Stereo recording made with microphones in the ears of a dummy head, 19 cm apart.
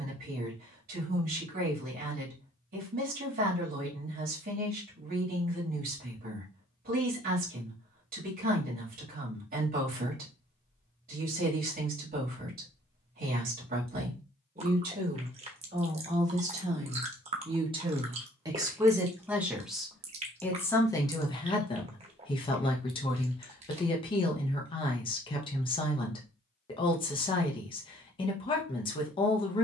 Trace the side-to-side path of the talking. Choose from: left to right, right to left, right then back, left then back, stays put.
right to left.